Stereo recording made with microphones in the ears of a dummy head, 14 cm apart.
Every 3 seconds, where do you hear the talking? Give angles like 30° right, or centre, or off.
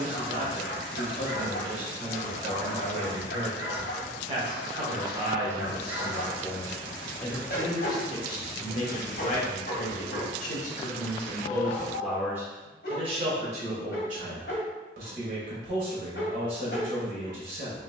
50° right, 30° right, 20° left, 40° left, 40° right, 50° right.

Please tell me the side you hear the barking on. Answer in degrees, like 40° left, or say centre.
60° left.